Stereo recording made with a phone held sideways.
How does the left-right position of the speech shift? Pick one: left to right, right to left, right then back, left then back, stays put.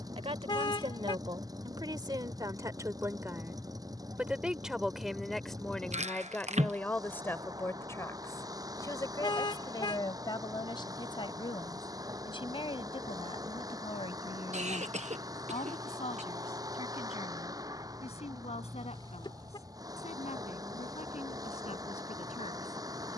right to left.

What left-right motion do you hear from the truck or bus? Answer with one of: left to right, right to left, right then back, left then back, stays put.
stays put.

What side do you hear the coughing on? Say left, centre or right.
right.